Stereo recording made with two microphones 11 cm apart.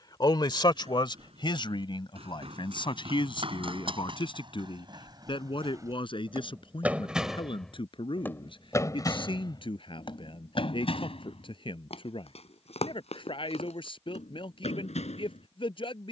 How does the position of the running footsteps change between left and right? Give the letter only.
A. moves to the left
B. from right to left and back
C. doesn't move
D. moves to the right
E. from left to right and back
A.